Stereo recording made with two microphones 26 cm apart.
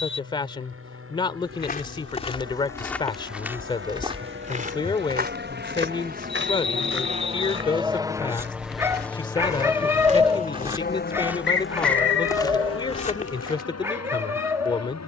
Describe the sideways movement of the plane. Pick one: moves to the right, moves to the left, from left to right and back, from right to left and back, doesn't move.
moves to the left.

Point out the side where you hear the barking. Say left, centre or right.
centre.